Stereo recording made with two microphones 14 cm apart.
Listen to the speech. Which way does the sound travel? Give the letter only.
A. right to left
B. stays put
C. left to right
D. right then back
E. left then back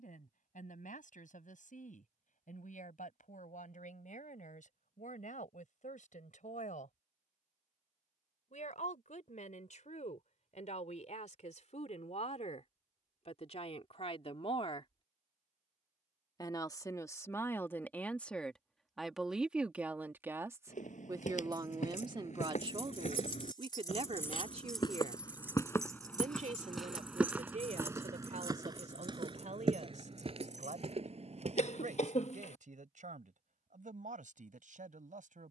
C.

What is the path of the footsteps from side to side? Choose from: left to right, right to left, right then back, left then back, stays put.
left to right.